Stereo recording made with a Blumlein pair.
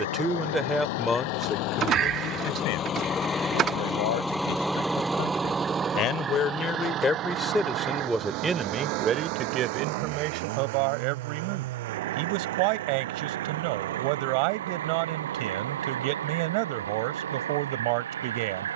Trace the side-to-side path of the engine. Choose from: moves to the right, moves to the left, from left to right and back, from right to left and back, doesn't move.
moves to the right.